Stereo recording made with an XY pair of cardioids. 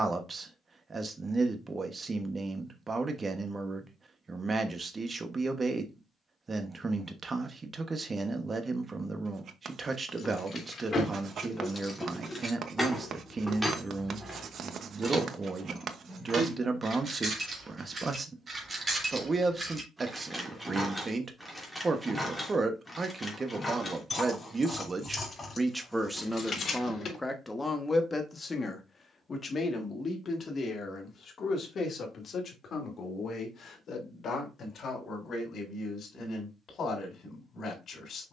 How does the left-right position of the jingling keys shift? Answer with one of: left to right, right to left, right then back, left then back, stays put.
right then back.